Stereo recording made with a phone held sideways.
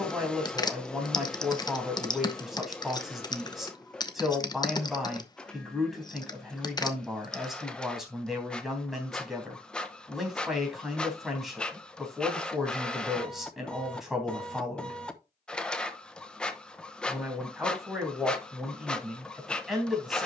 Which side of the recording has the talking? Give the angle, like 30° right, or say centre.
centre.